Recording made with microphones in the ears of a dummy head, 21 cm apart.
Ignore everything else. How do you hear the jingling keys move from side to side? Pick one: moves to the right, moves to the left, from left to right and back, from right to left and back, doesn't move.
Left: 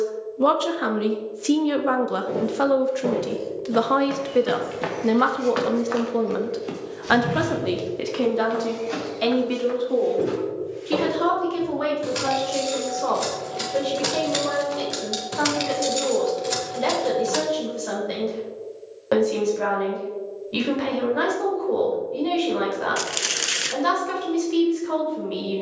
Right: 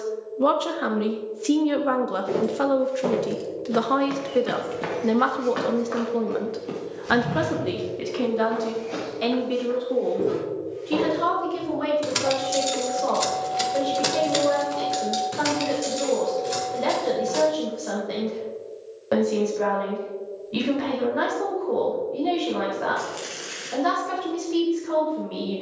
moves to the left.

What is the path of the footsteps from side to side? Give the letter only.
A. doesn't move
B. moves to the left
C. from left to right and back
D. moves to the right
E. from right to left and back
B.